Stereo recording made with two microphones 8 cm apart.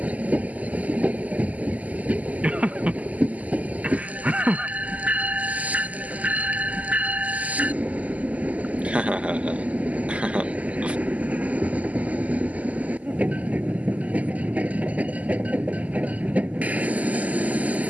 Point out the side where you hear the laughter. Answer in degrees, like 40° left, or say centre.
20° right.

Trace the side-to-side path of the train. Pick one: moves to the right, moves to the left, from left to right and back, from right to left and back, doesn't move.
doesn't move.